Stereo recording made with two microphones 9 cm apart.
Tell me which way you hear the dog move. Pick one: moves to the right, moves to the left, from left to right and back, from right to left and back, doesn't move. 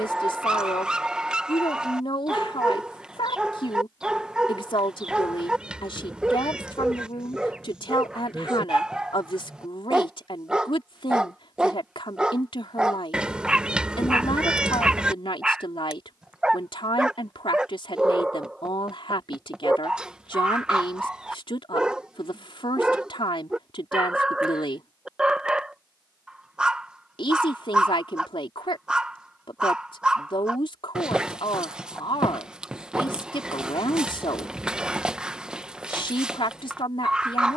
doesn't move.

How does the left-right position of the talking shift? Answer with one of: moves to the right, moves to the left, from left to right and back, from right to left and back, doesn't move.
doesn't move.